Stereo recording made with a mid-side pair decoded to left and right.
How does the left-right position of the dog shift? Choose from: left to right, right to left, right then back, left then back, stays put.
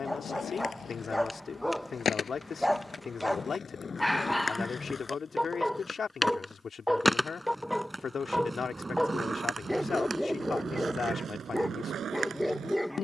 stays put.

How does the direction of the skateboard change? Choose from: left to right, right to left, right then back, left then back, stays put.
left to right.